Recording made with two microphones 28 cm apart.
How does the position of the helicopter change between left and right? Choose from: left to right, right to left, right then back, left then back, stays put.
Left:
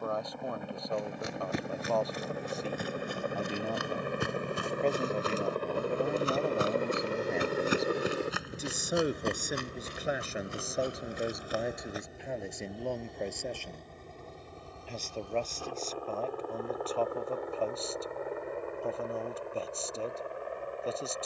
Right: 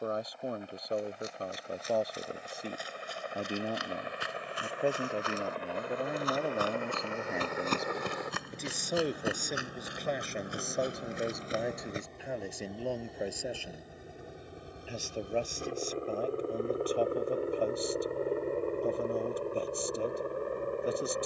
left to right.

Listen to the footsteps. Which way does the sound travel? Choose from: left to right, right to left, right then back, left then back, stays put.
left to right.